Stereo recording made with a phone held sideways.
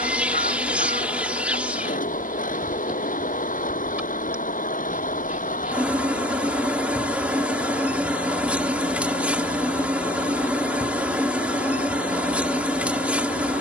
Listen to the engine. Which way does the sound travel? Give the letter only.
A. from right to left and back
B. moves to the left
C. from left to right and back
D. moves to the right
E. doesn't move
E.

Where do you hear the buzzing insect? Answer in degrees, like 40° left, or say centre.
10° right.